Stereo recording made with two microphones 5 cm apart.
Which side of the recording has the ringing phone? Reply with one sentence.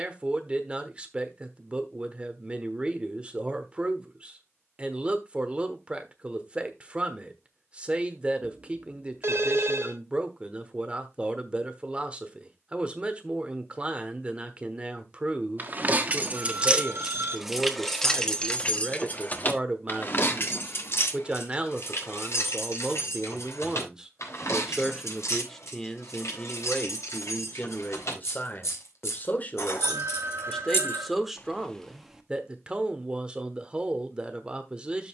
You can hear the ringing phone on the right.